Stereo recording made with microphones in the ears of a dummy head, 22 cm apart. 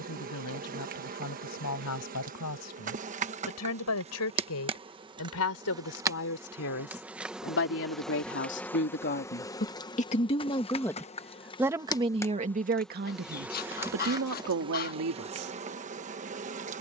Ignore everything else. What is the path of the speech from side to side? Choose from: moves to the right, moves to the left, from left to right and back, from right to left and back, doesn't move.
moves to the right.